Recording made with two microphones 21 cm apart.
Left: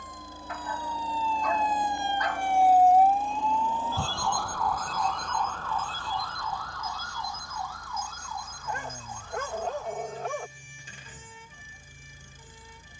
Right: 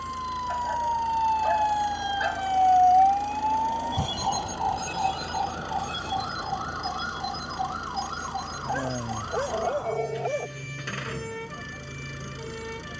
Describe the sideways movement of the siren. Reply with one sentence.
You can hear the siren go from the left side to the right.